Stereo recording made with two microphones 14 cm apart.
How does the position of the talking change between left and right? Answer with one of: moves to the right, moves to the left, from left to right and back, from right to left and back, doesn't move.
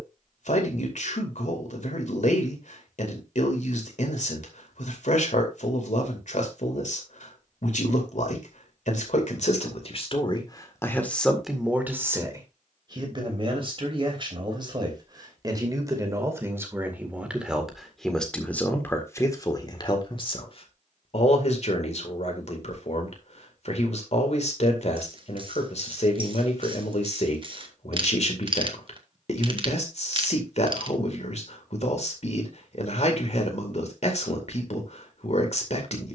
from left to right and back.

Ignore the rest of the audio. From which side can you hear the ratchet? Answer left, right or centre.
right.